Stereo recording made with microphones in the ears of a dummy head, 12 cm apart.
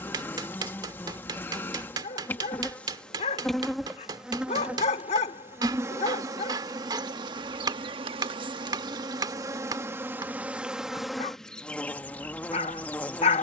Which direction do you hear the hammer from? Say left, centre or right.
right.